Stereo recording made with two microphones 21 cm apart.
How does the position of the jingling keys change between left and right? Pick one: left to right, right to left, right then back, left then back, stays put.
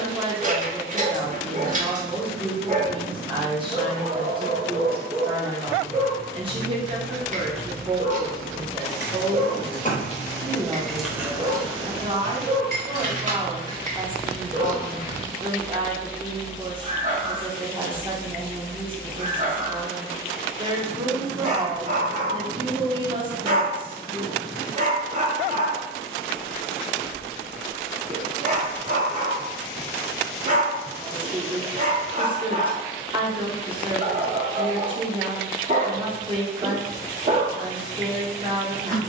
right then back.